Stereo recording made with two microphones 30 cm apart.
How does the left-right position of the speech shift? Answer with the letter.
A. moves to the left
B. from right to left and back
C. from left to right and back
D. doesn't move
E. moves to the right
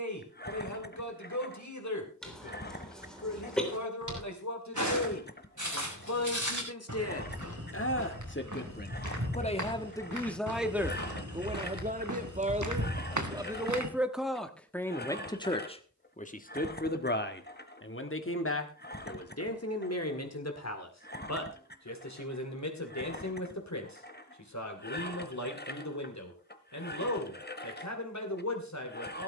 C.